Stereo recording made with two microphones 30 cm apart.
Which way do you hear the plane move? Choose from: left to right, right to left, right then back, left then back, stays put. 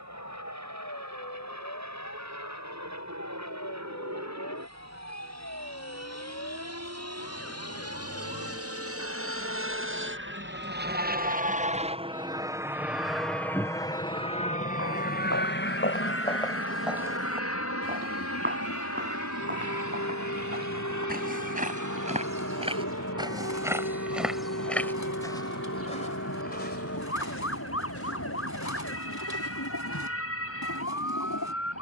right to left.